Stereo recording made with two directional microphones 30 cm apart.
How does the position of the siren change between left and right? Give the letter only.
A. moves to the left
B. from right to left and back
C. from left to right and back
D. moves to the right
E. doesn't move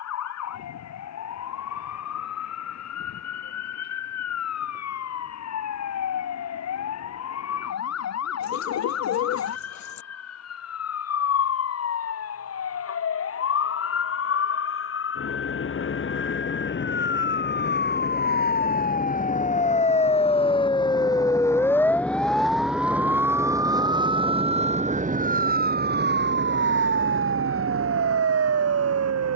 D.